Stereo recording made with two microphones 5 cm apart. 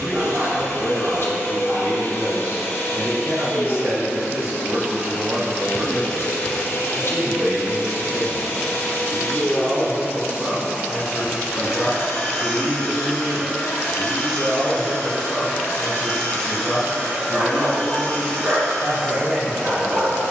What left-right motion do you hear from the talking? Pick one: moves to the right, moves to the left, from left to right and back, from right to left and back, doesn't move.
moves to the left.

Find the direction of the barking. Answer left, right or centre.
right.